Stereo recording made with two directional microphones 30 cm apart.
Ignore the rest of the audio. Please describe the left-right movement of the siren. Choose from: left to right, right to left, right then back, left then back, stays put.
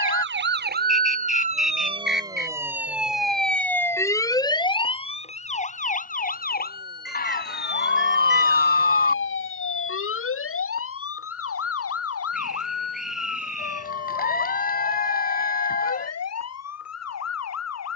right to left.